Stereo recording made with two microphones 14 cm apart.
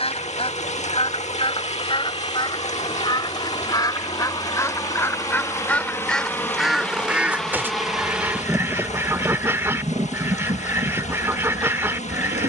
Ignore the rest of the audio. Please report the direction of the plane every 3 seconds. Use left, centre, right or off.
left, left, centre, right.